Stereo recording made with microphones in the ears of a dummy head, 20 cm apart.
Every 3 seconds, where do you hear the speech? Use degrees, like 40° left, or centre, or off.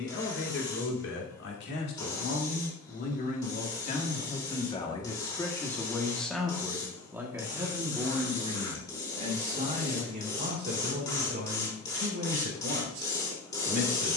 50° left, 30° left, 10° right, 40° right, 50° right.